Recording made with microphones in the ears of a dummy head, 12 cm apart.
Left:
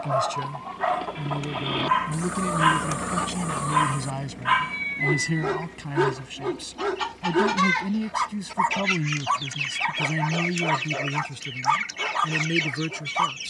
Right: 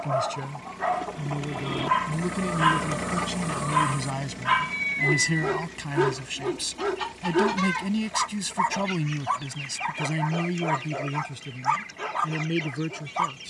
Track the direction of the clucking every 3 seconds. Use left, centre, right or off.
left, centre, left, left, left.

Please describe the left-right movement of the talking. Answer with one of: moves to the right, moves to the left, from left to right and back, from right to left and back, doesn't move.
from left to right and back.